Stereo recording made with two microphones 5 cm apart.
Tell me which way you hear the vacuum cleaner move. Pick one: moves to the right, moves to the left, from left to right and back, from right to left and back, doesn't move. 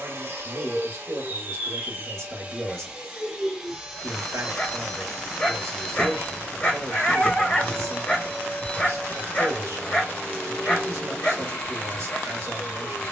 moves to the left.